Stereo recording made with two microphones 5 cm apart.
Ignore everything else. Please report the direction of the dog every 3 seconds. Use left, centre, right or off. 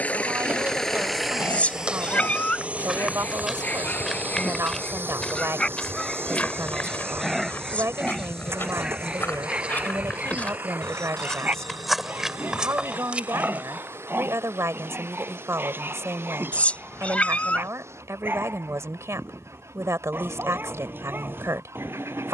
left, left, centre, right, right, right, right, right.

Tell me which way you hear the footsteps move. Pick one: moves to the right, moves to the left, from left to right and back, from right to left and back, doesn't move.
from right to left and back.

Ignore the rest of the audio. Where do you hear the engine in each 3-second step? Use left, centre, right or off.
centre, right, right, right, right, right, right, right.